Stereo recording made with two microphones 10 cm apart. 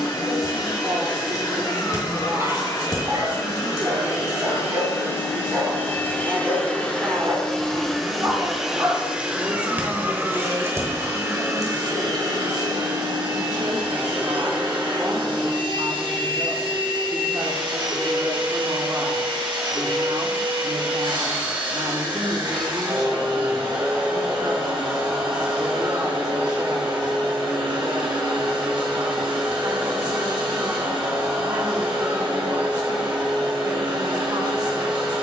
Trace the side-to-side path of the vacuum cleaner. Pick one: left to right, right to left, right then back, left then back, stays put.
left to right.